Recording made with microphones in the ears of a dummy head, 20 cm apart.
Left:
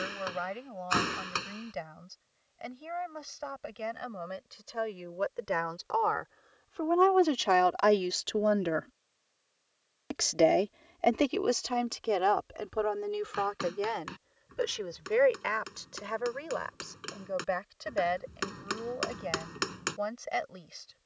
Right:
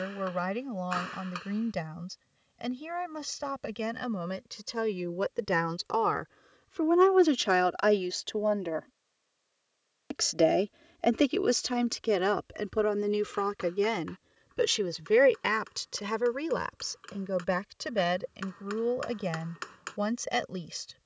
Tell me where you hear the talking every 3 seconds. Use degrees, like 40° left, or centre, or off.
60° right, 60° right, 10° right, 20° right, 40° right, 60° right, 60° right.